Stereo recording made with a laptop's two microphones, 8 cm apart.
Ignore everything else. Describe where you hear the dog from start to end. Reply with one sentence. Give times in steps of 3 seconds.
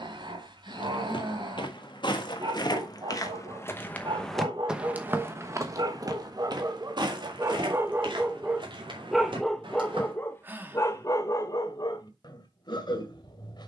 In this clip you hear the dog on the right from 0 s and on the left from 9 s.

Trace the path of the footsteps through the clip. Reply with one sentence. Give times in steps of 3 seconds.
You can hear the footsteps on the left from 0 s, in the centre from 3 s, on the right from 6 s and not at all from 12 s.